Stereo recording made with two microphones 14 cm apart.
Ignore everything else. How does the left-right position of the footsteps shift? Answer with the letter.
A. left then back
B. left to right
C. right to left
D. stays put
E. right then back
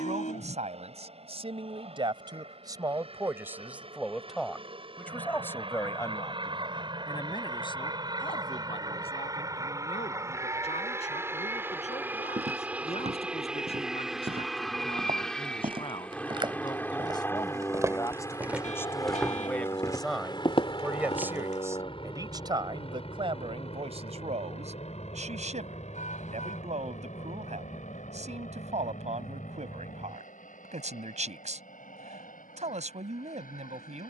C.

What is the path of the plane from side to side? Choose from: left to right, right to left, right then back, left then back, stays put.
right to left.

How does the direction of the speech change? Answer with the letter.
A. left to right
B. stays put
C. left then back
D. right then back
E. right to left
C.